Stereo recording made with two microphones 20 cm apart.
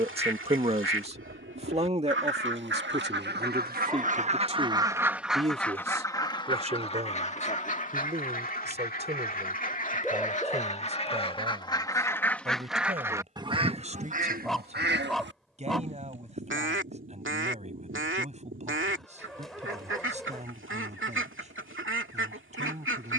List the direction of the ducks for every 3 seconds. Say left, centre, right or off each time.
right, right, left, left, right, right, right, right.